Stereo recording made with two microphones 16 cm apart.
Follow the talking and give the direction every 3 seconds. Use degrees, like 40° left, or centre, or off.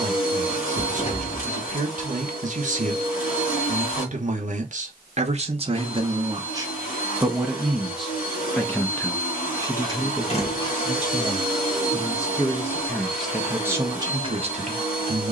50° right, 50° right, 10° right, 20° left, 10° right.